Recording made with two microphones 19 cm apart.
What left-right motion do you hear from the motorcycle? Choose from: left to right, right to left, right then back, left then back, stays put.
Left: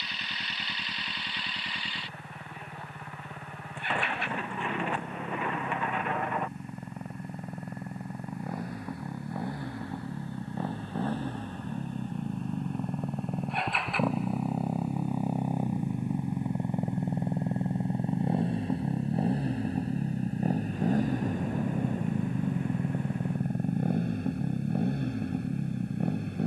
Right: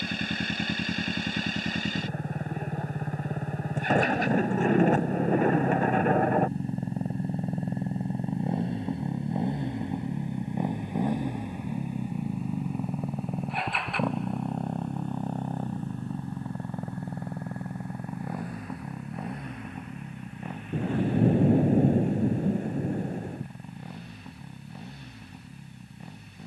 right to left.